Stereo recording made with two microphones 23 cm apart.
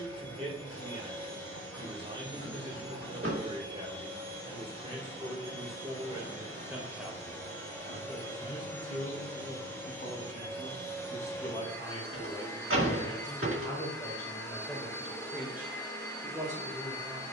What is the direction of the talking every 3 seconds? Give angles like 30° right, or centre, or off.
20° right, 20° right, centre, 30° left, 10° left, 10° right.